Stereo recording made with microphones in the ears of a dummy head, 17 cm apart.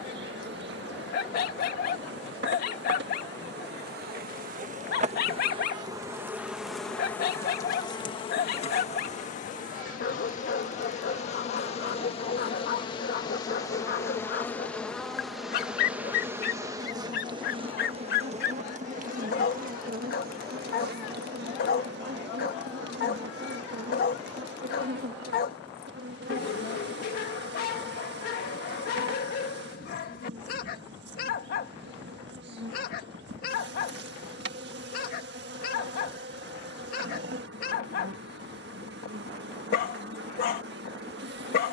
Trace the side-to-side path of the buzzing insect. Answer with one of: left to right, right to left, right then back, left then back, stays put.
left then back.